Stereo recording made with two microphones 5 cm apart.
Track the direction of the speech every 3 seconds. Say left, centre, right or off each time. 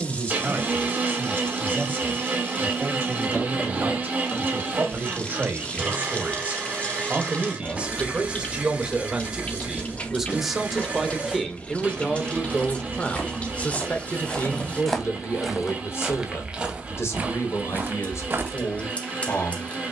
right, right, right, centre, left, left, left.